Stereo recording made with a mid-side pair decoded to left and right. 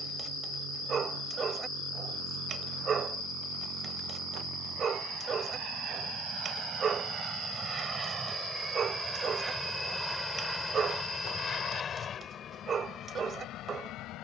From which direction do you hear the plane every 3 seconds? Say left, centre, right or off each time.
right, right, right, centre, left.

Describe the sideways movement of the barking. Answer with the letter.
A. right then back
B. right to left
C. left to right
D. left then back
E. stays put
E.